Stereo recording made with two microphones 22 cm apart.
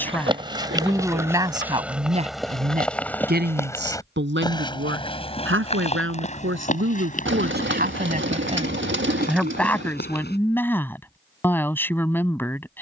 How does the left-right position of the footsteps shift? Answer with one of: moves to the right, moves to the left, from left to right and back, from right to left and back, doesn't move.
moves to the left.